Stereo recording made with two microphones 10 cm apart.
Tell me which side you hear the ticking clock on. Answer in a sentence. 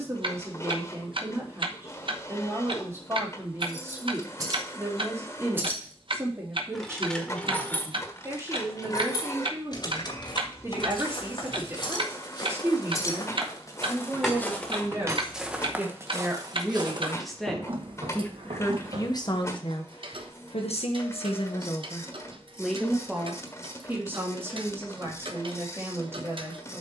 In this clip you hear the ticking clock on the right.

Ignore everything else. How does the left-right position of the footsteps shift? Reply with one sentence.
You can hear the footsteps go from the left side to the right.